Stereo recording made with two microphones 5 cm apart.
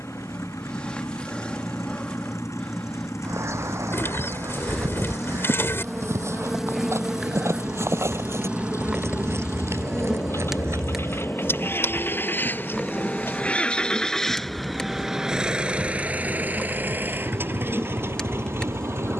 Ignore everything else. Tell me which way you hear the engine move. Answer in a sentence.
In this clip you hear the engine travel towards the right.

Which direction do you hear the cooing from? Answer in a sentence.
You can hear the cooing on the left.